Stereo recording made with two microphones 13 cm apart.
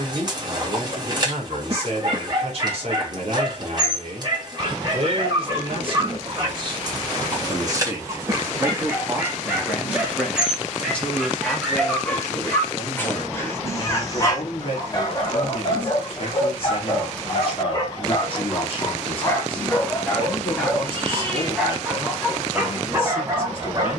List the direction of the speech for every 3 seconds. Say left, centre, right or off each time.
right, right, right, centre, left, left, left, left.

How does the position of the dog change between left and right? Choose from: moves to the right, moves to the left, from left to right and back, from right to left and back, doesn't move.
from right to left and back.